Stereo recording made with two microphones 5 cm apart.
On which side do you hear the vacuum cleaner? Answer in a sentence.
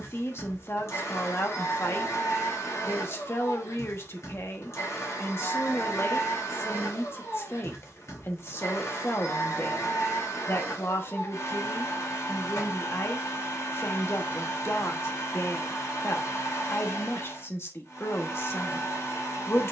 In this clip you hear the vacuum cleaner on the left.